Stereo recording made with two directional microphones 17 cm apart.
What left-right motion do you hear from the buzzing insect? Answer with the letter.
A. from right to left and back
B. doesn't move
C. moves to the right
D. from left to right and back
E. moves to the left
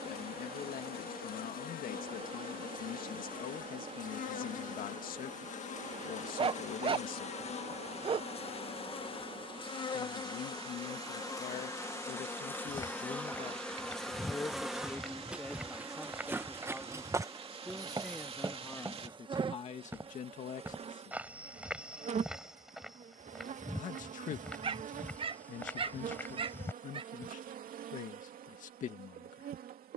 C.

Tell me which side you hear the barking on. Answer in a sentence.
In this clip you hear the barking on the right.